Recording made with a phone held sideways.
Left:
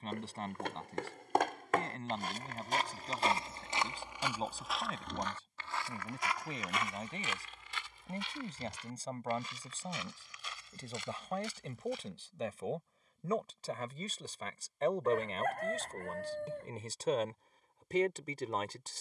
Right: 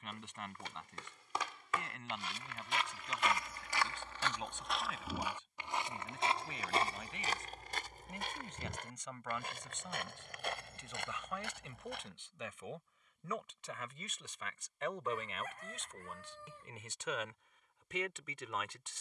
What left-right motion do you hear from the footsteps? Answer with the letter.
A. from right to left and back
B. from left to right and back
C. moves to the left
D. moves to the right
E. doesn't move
D.